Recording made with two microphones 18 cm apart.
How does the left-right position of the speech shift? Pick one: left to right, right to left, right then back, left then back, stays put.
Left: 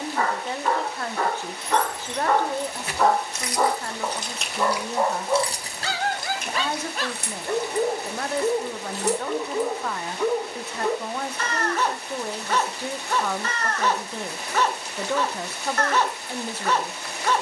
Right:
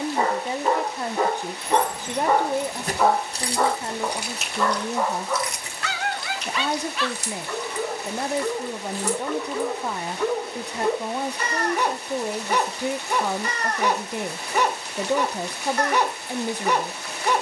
stays put.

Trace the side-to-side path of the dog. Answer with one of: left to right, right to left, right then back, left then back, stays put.
left then back.